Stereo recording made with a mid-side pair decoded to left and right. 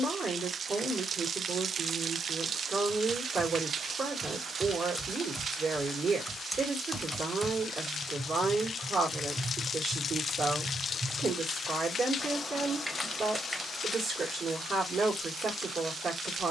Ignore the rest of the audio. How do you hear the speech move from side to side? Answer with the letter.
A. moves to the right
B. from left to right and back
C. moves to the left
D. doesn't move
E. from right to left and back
D.